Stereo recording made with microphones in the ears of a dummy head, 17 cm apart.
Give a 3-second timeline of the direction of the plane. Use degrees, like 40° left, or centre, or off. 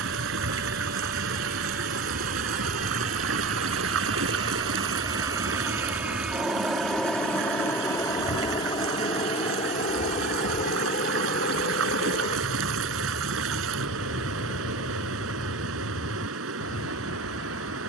50° right, 30° right, 10° left, 40° left, 50° left, 60° left.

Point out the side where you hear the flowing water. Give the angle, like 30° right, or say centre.
80° right.